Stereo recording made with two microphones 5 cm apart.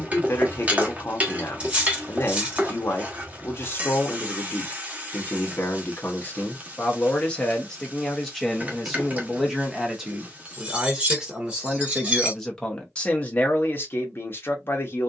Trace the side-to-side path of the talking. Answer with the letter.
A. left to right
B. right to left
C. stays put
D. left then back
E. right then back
E.